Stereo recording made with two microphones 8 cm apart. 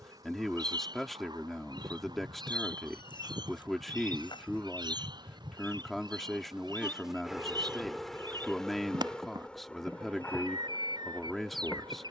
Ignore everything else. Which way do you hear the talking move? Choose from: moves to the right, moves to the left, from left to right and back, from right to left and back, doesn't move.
doesn't move.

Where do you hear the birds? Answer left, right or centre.
right.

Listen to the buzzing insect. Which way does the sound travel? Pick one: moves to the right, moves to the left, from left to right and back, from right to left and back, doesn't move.
moves to the left.